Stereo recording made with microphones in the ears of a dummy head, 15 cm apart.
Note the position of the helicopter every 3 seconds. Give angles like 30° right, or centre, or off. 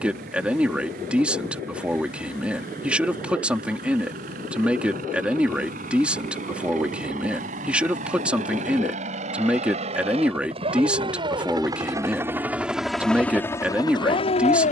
60° right, 60° right, 50° right, 40° right, 10° left.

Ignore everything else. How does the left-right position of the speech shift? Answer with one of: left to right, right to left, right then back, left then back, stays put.
stays put.